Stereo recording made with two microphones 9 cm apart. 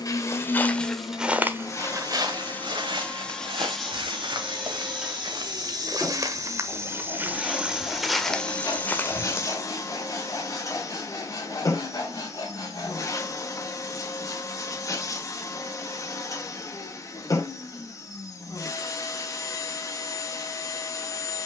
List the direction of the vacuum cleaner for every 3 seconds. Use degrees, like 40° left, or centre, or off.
30° left, centre, 10° left, 40° left, 40° left, 40° left, 40° left.